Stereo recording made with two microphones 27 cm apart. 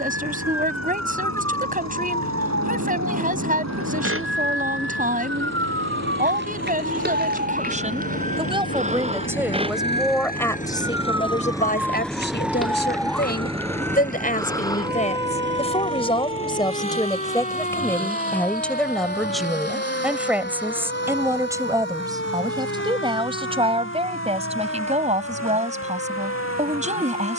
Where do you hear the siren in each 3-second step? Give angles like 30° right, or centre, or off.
60° right, 50° right, 30° right, 10° right, 10° left, 20° left, 30° left, 40° left, 50° left.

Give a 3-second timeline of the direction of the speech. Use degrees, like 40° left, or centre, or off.
30° right, 30° right, 30° right, 10° left, 30° left, 20° left, centre, 20° right, 20° right.